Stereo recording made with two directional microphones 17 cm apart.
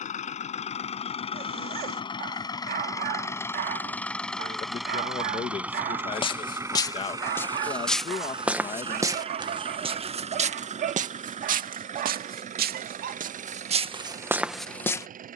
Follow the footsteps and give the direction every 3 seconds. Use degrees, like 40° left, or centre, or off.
off, off, 10° left, 40° right, 40° right.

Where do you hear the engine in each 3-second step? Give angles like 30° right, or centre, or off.
30° left, centre, 20° right, 40° right, 50° right.